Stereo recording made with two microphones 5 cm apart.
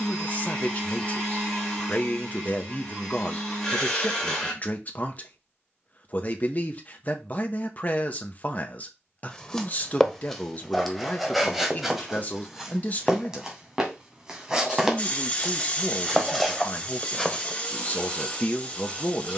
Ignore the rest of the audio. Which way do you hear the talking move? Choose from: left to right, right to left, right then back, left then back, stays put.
stays put.